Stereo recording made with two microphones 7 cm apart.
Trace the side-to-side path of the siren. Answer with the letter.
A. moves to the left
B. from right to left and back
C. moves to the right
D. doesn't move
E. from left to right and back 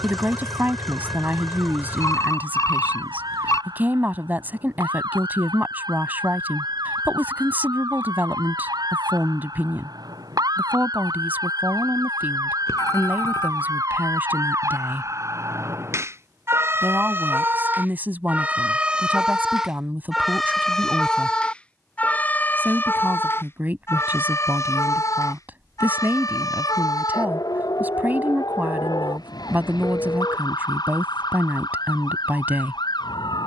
A.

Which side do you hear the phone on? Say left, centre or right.
left.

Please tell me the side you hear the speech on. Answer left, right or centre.
right.